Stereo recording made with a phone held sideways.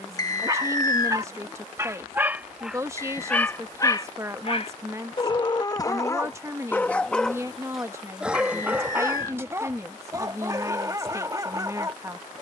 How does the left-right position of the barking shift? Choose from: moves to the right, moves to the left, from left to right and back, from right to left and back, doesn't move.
from right to left and back.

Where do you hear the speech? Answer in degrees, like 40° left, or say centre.
20° right.